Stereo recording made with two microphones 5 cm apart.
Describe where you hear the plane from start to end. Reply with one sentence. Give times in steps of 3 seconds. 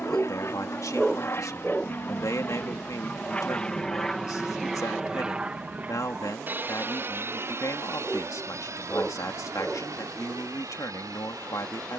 In this clip you hear the plane on the left from 0 s, in the centre from 3 s and on the right from 6 s.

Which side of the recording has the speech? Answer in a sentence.
In this clip you hear the speech on the left.